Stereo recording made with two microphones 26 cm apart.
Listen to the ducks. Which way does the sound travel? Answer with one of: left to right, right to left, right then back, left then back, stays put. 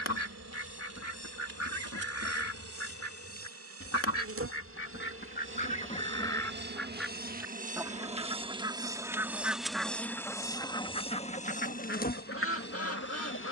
right then back.